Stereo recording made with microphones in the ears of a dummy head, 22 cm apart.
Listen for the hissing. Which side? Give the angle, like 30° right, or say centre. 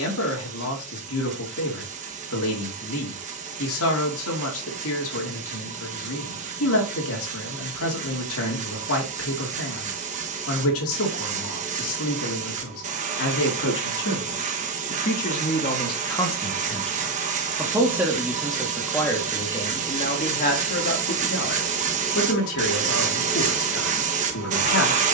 30° right.